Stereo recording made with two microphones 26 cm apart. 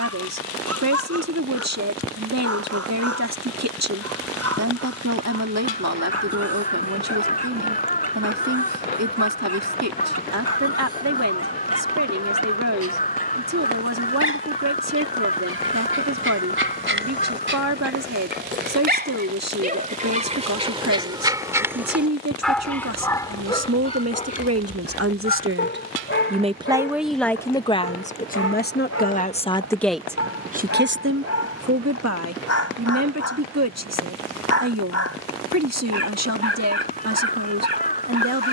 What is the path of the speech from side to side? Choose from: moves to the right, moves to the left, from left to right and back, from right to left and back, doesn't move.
from right to left and back.